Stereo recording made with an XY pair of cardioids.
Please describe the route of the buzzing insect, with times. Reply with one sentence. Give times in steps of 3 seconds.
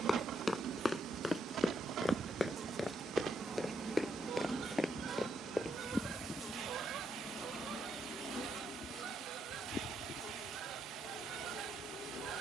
In this clip you hear the buzzing insect on the right from 0 s, in the centre from 3 s and on the left from 6 s.